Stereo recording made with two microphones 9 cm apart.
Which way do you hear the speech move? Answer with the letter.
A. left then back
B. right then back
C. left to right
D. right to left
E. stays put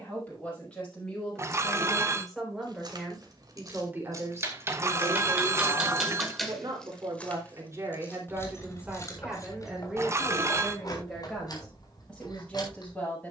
B.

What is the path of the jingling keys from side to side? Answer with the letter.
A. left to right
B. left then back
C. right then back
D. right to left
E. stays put
D.